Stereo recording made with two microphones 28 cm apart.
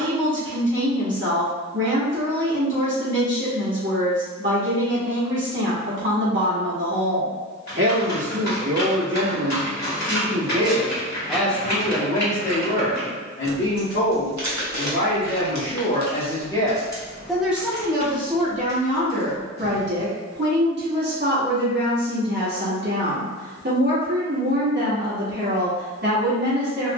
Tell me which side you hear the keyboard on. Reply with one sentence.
You can hear the keyboard on the left.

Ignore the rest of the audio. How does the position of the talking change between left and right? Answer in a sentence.
In this clip you hear the talking go left and come back.